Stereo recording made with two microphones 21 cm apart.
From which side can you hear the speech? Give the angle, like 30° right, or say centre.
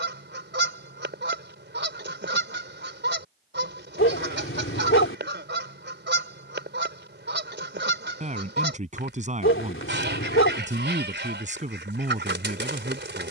40° right.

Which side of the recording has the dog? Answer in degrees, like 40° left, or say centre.
80° left.